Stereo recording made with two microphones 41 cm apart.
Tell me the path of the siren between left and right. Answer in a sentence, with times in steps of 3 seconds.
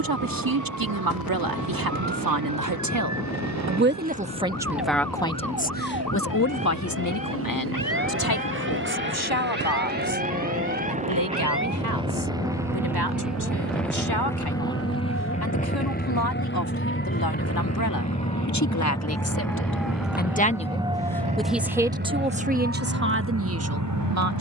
In this clip you hear the siren on the left from 0 s, in the centre from 18 s and on the right from 21 s.